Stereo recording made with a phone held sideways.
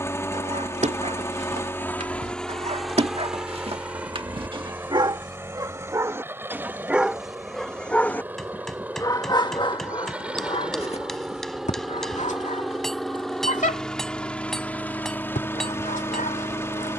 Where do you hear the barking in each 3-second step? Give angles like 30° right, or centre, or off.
50° right, 40° right, centre, 40° left, 60° left, 70° left.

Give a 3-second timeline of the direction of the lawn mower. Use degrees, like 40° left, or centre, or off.
10° left, 10° right, 10° right, 10° right, centre, 20° left.